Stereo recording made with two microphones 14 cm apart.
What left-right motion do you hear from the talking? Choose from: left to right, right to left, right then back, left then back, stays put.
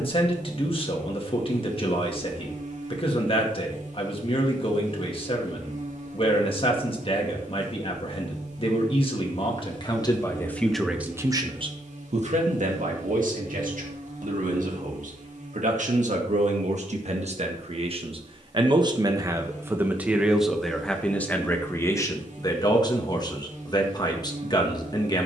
right then back.